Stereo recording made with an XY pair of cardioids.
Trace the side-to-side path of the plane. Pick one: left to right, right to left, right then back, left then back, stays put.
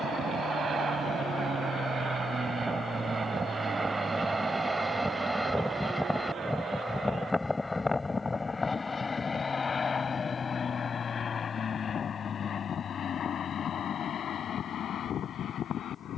right to left.